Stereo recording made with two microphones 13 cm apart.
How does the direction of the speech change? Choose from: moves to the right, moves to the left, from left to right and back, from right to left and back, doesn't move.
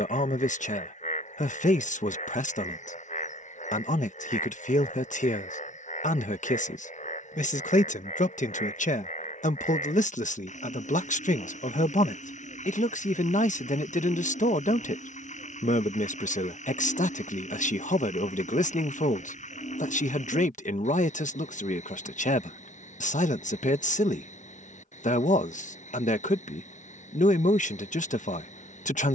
doesn't move.